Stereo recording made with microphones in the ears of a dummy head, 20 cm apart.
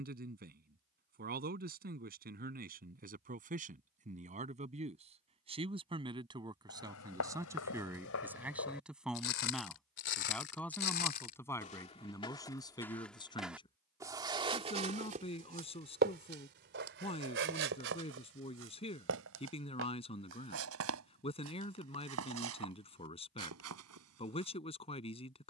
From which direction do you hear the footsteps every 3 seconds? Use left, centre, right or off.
off, off, left, left, centre, right, right, right, right.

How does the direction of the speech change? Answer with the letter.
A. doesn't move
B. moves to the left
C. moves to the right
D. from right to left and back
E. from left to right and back
B.